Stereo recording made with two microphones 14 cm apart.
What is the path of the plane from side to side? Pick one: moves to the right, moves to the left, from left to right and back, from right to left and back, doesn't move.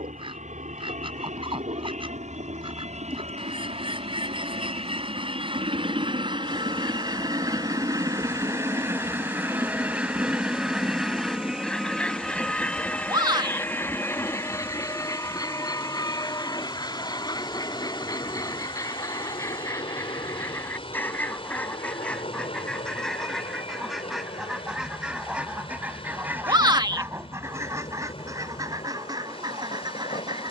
moves to the left.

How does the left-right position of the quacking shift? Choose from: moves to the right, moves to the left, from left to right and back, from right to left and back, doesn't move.
from right to left and back.